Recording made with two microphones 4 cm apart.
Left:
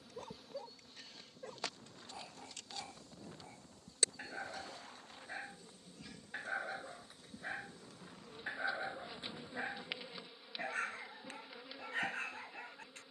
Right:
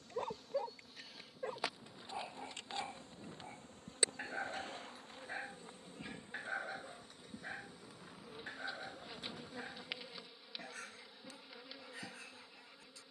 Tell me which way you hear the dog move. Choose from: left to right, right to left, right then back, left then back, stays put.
right to left.